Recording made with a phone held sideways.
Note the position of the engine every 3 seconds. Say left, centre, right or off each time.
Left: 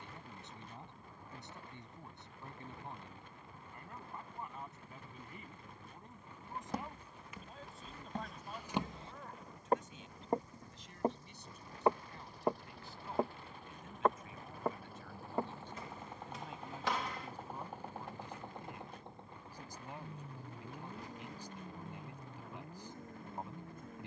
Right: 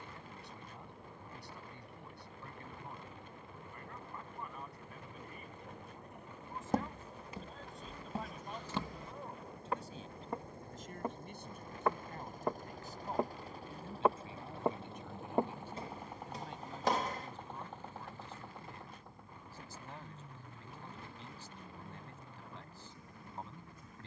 right, right, right, right, right, centre, left, left.